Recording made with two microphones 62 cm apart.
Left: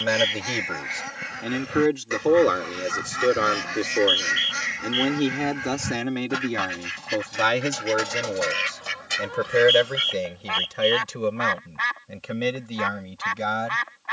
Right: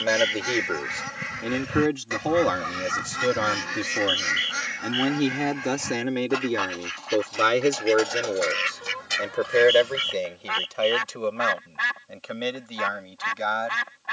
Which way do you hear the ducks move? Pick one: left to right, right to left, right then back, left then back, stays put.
left then back.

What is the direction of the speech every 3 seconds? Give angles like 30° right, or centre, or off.
centre, 10° right, 20° left, 40° left, 50° left.